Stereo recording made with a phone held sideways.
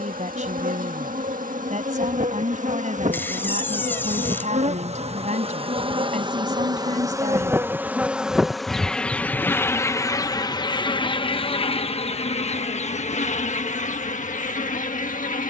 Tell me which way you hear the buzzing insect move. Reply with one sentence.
You can hear the buzzing insect travel towards the left.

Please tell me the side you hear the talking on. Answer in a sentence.
You can hear the talking on the right.